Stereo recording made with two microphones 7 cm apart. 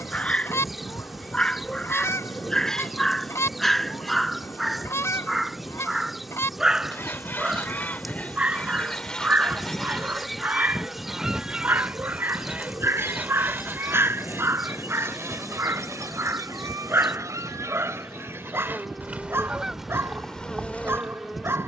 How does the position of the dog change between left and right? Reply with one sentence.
You can hear the dog move to the right.